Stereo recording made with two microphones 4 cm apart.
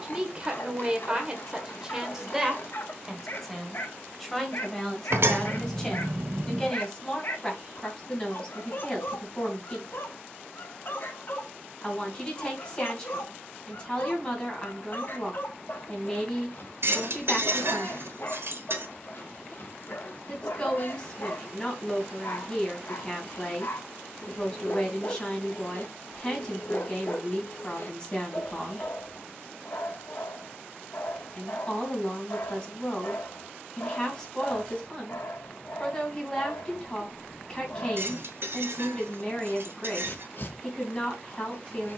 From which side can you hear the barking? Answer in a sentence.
In this clip you hear the barking on the left.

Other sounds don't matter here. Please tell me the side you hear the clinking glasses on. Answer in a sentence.
In this clip you hear the clinking glasses on the right.